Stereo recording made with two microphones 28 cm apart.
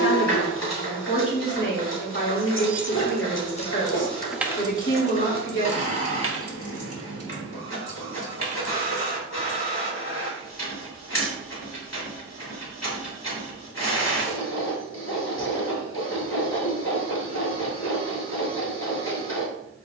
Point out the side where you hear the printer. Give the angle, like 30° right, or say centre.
70° left.